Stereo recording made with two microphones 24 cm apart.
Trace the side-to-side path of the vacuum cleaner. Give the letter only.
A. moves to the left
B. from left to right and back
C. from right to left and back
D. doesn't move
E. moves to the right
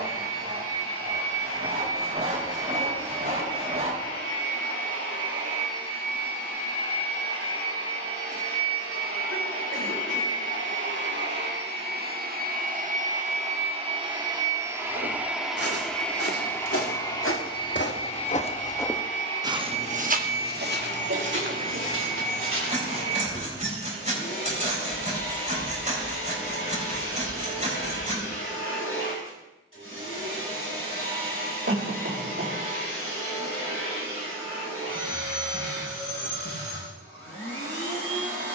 A.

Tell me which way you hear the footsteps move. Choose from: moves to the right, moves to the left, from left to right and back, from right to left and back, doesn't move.
moves to the right.